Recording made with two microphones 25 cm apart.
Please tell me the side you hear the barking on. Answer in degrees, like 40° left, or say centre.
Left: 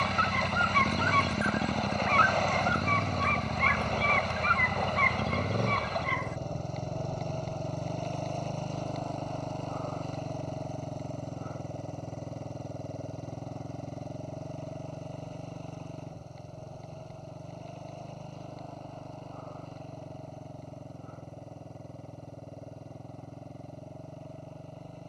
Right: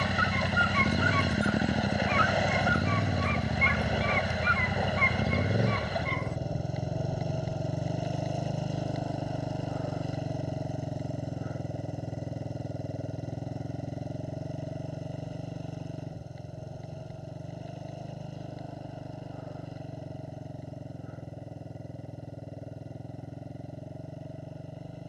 70° left.